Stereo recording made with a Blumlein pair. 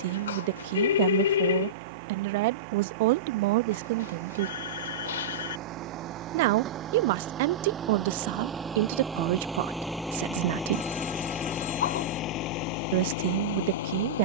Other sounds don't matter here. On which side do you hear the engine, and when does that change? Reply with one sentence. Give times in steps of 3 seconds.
You can hear the engine on the right from 0 s, in the centre from 9 s and on the left from 12 s.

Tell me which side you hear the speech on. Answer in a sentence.
You can hear the speech on the right.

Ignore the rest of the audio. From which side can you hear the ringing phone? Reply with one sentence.
You can hear the ringing phone on the left.